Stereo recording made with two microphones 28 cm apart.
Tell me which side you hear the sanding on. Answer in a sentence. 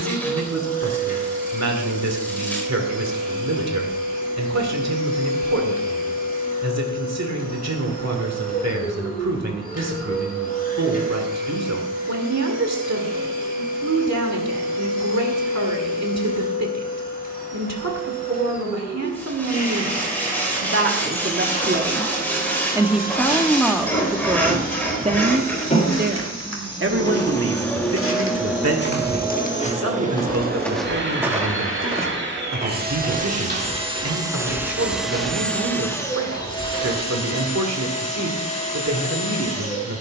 You can hear the sanding in the centre.